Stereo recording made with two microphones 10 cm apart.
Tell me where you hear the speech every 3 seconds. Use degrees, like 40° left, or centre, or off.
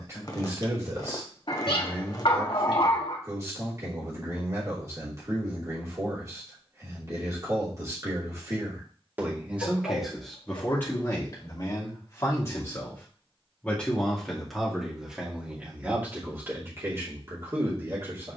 30° right, 30° right, 30° right, 10° left, 10° left, 20° right.